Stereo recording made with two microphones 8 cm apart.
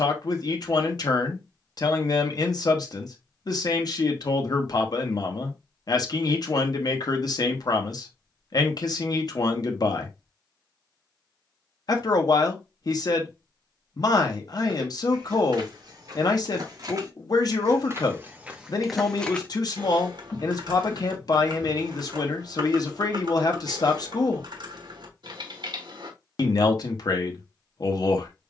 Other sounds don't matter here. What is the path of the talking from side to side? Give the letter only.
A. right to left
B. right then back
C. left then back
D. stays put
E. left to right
D.